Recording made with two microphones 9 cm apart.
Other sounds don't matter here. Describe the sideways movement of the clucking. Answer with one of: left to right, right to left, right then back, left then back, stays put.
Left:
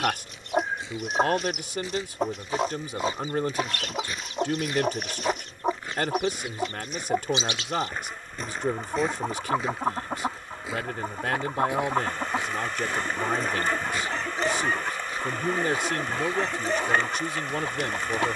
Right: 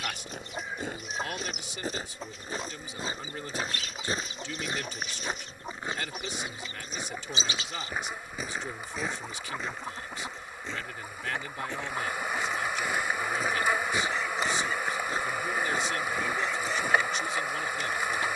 stays put.